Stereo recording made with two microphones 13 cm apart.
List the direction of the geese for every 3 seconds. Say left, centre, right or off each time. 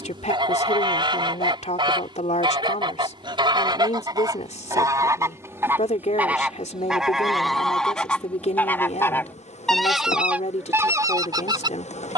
right, right, centre, centre.